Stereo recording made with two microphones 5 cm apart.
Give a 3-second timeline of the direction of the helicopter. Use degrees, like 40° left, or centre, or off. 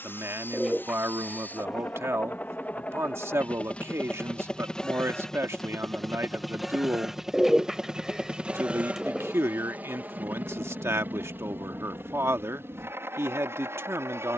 40° left, 20° left, 10° right, 40° right, 50° right.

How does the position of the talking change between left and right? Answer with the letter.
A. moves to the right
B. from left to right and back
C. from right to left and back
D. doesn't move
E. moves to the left
D.